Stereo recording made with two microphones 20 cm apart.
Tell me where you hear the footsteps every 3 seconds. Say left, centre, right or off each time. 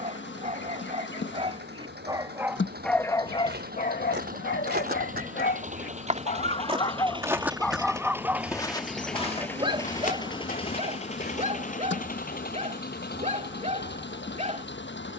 off, right, centre, left, off.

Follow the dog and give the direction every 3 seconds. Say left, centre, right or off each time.
right, left, centre, right, right.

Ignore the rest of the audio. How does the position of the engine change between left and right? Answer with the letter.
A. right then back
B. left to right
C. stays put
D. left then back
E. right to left
E.